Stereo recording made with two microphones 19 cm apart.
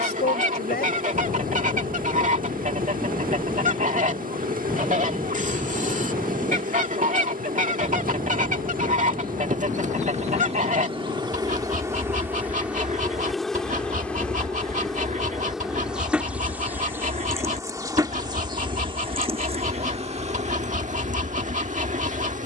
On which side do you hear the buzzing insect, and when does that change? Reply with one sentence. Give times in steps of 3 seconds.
You can hear the buzzing insect on the right from 0 s, in the centre from 12 s and on the right from 18 s.